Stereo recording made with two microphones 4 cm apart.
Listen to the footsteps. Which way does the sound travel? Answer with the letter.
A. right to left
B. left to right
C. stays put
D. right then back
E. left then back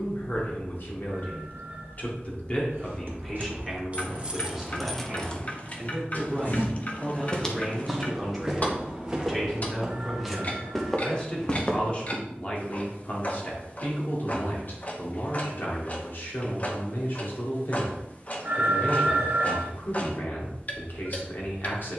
D.